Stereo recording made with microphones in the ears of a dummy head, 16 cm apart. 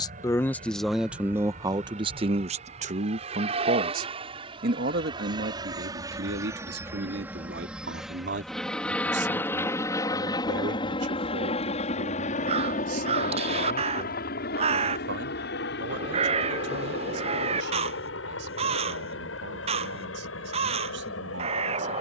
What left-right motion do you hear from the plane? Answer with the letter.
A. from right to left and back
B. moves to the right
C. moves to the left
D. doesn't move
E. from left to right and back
C.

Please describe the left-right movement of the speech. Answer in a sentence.
You can hear the speech move from left to right.